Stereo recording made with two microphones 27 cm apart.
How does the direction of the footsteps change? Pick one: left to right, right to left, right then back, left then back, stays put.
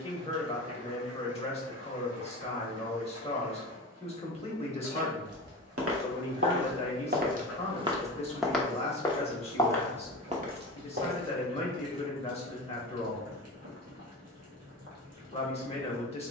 left then back.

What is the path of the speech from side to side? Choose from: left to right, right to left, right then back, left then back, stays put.
stays put.